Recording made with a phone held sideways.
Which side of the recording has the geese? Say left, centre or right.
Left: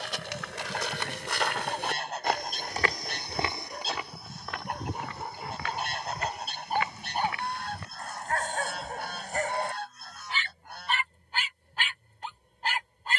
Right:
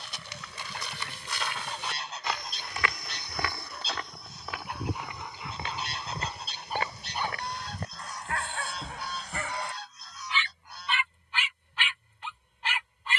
left.